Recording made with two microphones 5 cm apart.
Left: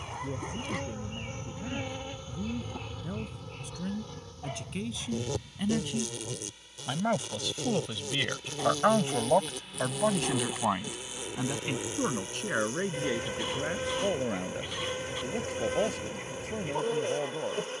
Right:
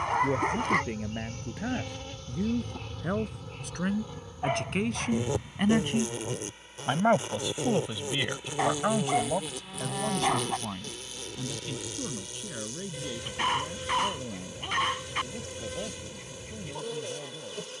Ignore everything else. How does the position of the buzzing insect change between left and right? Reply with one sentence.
In this clip you hear the buzzing insect move from left to right and back again.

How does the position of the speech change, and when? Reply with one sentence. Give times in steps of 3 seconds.
In this clip you hear the speech on the right from 0 s, in the centre from 6 s and on the left from 9 s.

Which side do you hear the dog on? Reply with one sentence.
You can hear the dog on the right.